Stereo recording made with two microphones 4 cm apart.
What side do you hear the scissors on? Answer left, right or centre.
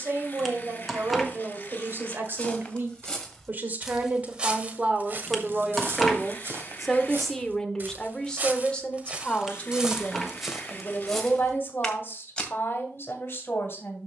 centre.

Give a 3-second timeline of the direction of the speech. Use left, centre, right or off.
right, right, centre, left, left.